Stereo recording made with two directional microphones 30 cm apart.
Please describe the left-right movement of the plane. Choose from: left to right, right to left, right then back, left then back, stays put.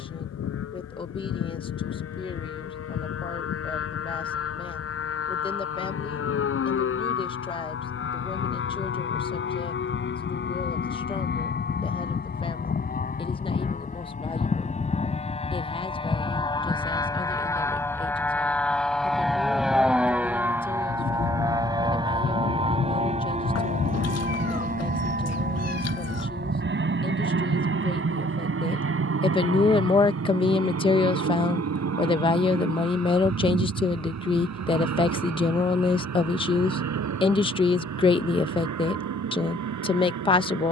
left to right.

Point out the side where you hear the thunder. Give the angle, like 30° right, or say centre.
30° left.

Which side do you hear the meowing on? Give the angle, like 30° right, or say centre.
60° left.